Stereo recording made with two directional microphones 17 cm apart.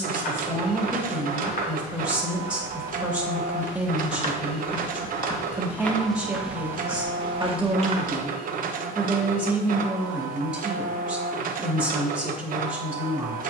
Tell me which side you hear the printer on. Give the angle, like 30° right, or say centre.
60° right.